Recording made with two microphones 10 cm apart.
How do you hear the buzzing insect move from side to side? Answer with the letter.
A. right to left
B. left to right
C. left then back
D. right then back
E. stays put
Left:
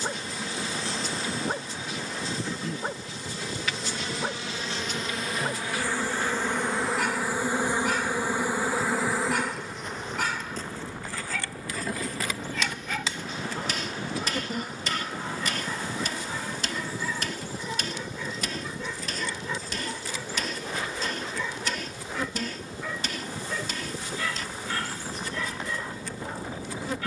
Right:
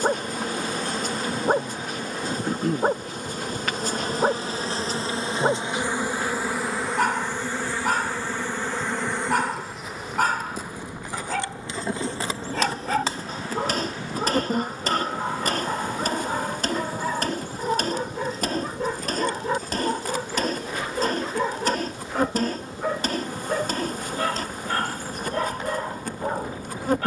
C.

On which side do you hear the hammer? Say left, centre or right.
right.